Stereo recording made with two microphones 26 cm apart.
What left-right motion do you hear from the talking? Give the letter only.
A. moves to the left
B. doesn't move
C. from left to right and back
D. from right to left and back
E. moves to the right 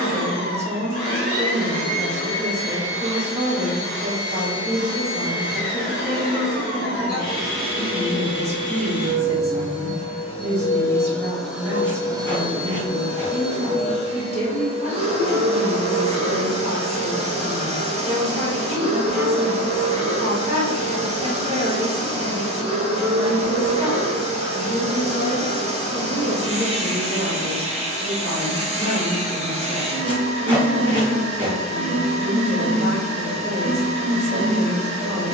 B.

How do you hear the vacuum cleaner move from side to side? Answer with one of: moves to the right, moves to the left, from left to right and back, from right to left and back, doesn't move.
moves to the right.